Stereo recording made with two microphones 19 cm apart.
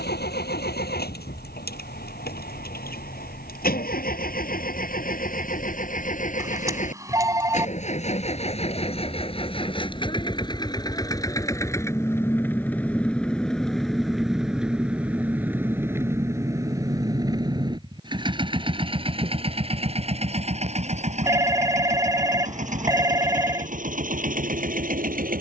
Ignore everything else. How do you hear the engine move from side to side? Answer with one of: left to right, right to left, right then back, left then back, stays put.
left to right.